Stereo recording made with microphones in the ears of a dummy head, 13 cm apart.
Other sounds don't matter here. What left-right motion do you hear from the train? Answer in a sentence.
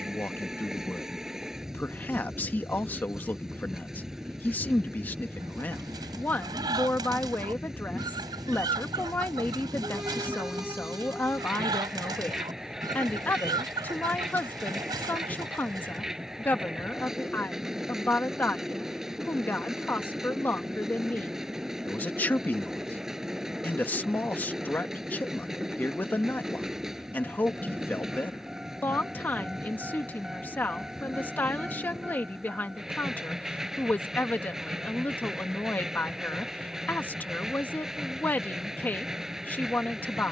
In this clip you hear the train stay in one place.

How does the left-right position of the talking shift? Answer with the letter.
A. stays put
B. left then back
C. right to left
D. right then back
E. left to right
A.